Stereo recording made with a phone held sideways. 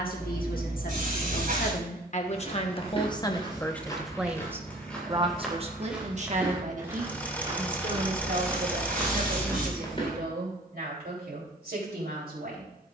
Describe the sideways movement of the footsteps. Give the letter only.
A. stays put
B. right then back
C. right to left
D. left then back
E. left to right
B.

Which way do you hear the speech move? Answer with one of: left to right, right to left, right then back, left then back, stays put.
left to right.